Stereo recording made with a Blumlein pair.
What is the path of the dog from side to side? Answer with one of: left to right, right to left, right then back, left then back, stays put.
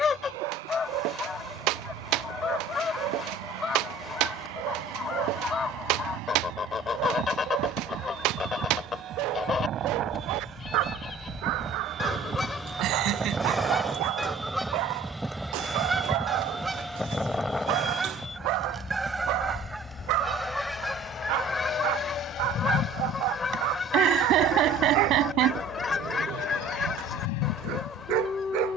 stays put.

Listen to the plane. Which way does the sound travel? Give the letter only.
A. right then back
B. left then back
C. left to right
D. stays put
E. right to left
E.